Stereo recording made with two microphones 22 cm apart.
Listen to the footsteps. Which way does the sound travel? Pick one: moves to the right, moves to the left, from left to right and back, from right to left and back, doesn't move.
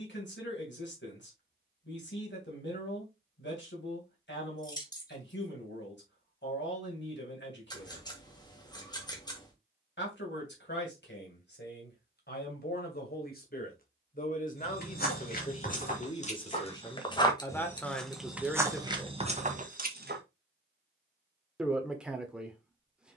moves to the right.